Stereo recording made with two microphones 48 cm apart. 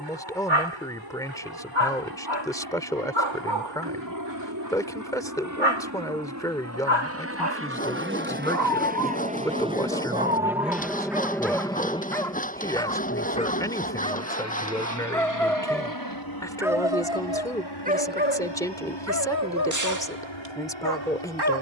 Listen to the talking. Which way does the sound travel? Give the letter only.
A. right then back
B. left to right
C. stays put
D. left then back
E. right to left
C.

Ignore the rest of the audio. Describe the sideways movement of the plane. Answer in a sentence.
In this clip you hear the plane go from the right side to the left.